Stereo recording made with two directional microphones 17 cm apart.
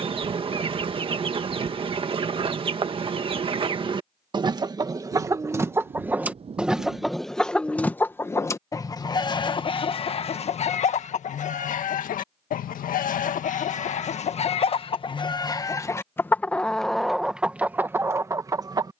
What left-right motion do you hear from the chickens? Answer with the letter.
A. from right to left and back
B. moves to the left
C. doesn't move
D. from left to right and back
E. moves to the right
A.